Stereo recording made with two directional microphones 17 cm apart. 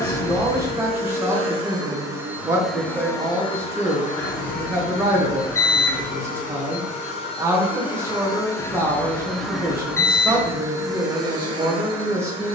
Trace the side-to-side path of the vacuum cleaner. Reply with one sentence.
You can hear the vacuum cleaner move from right to left and back again.